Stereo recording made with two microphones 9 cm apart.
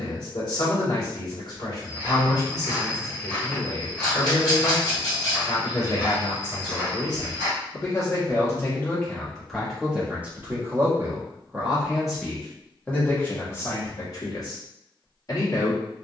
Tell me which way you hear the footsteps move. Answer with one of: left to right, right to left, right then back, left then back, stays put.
left then back.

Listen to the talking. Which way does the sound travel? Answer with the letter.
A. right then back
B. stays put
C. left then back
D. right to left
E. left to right
A.